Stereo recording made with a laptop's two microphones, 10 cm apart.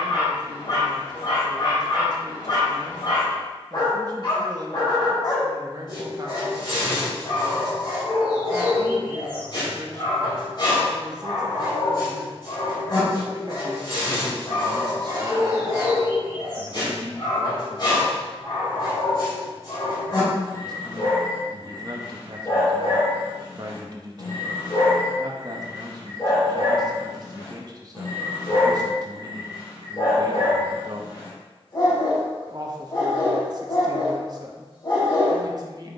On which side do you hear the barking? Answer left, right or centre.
left.